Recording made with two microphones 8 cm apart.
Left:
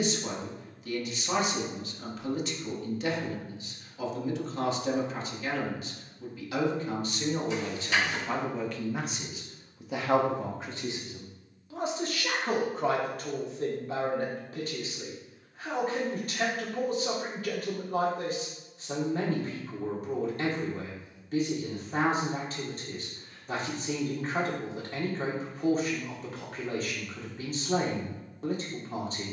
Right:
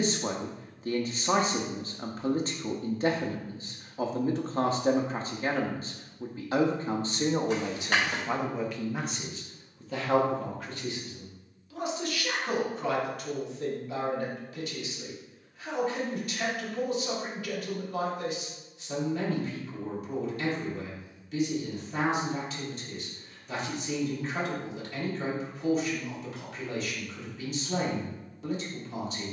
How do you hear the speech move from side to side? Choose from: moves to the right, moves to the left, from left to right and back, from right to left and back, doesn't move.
moves to the left.